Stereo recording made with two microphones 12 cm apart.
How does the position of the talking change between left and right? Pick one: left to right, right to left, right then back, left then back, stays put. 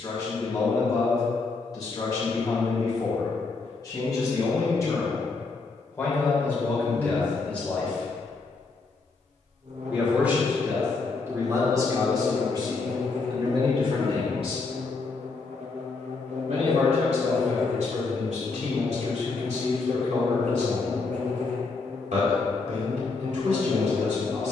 left to right.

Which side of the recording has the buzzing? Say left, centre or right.
right.